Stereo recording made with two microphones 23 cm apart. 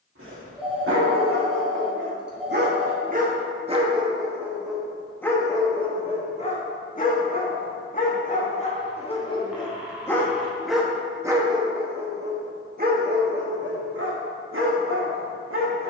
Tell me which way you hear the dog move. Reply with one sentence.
In this clip you hear the dog move from right to left and back again.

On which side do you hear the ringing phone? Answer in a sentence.
In this clip you hear the ringing phone in the centre.